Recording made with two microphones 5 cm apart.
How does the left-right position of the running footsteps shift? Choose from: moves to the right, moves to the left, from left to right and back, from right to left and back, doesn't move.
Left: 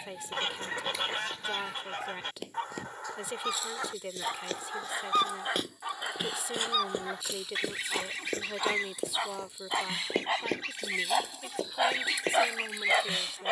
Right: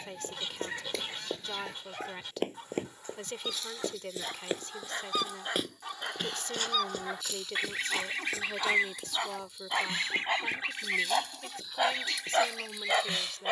moves to the left.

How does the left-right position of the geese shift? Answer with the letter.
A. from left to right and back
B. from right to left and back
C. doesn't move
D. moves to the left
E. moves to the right
A.